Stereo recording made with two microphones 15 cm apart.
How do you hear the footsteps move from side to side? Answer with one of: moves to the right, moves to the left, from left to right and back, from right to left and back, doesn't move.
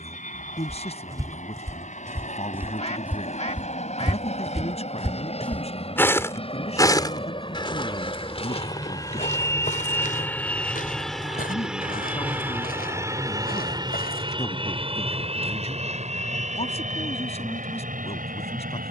moves to the left.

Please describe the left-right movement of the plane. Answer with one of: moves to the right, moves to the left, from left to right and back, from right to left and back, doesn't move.
moves to the right.